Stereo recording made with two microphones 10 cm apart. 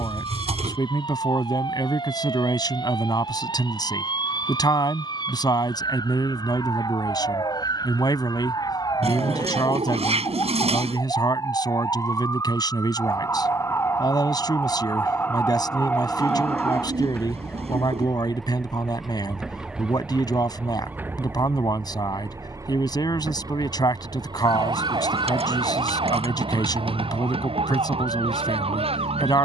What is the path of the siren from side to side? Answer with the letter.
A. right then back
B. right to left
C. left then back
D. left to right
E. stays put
D.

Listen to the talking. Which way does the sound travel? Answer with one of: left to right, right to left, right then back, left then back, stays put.
stays put.